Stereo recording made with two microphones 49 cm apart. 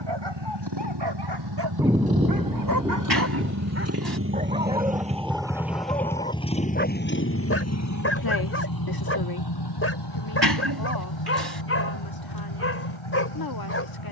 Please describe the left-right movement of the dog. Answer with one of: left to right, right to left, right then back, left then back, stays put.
right to left.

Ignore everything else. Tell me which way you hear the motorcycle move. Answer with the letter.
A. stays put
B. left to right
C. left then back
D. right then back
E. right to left
E.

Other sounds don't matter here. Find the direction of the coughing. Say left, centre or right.
right.